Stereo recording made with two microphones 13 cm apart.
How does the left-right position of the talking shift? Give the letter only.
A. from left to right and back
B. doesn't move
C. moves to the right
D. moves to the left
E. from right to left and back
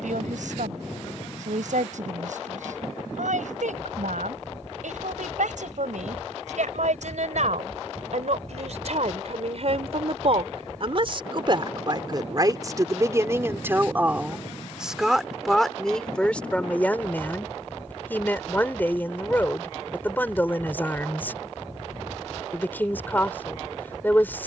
D.